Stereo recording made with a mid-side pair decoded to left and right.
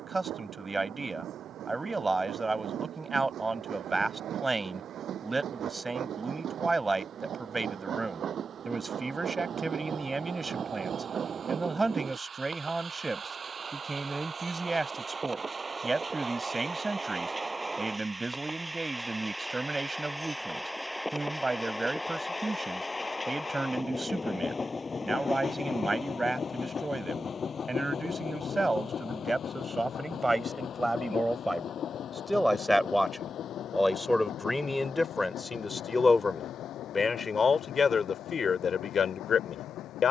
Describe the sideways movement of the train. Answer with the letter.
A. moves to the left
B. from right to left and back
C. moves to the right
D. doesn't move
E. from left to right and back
A.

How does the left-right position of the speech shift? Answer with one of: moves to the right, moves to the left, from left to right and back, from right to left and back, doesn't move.
moves to the left.